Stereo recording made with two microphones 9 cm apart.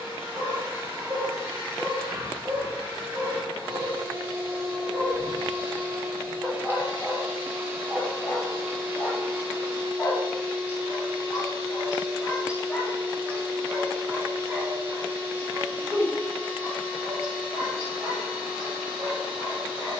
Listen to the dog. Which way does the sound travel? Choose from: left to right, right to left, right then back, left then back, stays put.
left then back.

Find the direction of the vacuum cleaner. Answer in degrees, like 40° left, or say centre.
30° right.